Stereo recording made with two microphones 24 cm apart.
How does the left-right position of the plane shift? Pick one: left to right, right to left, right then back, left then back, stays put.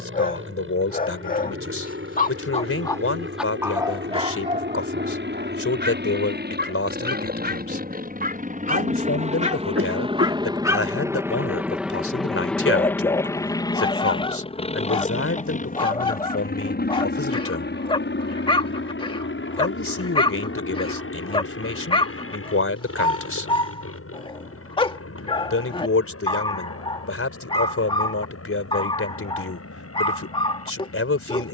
right to left.